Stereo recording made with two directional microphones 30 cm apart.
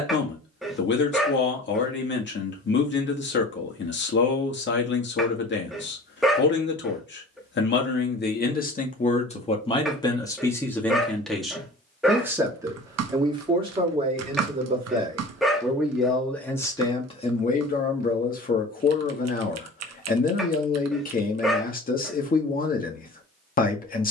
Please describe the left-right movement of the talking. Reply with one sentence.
You can hear the talking go right and come back.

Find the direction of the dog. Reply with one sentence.
In this clip you hear the dog in the centre.